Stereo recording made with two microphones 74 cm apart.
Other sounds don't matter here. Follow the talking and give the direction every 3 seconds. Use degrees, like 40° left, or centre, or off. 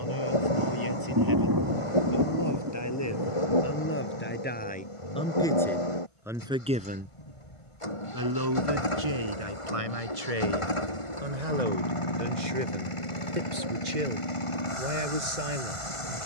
30° left, 10° left, 20° right, 50° right, 70° right, 80° right.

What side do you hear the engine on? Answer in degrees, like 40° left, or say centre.
40° left.